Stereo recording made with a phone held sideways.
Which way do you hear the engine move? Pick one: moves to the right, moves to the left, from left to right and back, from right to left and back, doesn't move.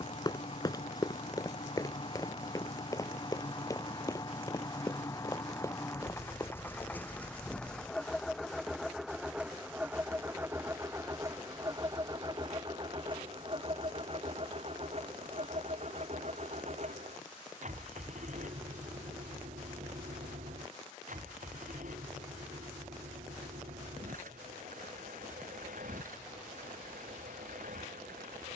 moves to the right.